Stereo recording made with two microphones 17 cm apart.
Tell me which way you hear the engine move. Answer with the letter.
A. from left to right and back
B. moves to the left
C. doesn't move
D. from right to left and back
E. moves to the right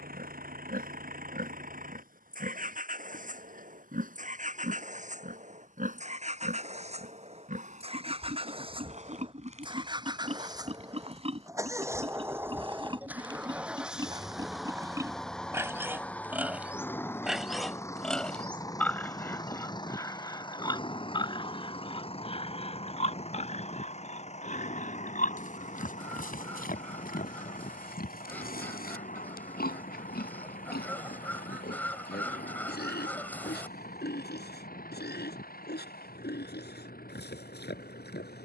B.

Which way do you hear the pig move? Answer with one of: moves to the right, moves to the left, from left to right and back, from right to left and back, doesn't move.
moves to the left.